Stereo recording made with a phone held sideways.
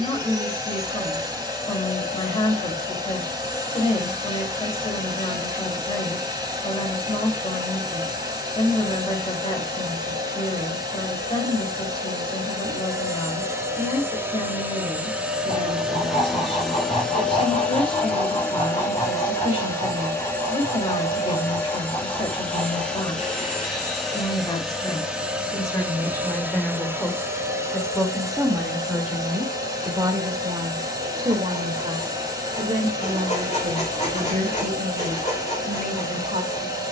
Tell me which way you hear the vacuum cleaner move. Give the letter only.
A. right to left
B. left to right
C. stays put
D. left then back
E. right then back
D.